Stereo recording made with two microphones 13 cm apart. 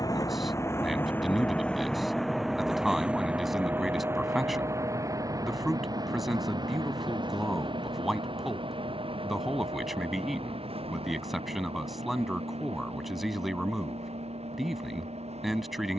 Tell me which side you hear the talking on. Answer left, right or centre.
centre.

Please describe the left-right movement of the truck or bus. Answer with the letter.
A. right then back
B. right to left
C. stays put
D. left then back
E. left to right
E.